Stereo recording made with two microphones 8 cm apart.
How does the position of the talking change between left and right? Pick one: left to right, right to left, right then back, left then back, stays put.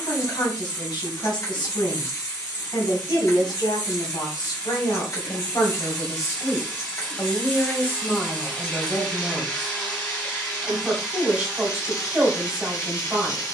left to right.